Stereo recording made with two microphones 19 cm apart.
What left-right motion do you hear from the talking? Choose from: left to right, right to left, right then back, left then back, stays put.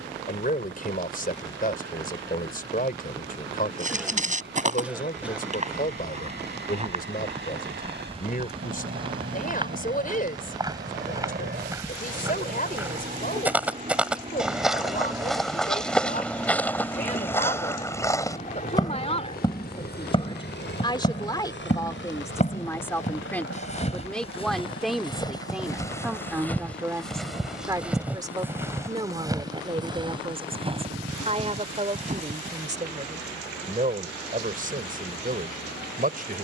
left to right.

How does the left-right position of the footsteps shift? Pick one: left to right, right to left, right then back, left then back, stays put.
left then back.